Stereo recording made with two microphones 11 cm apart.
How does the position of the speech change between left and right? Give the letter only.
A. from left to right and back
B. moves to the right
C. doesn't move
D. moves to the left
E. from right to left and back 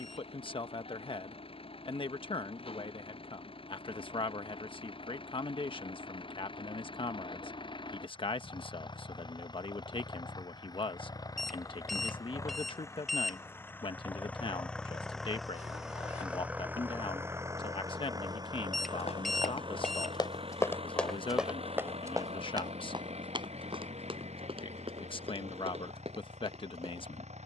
C.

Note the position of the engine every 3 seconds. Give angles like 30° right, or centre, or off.
60° left, 50° left, 50° left, 40° left, 20° left, 10° right, 50° right, 70° right, 80° right.